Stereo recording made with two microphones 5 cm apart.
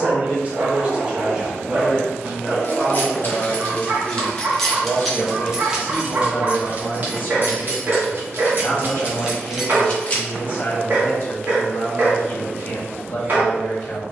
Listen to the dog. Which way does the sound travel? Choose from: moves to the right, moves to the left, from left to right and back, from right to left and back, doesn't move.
doesn't move.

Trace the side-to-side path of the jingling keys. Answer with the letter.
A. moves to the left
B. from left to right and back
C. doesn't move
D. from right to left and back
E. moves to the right
B.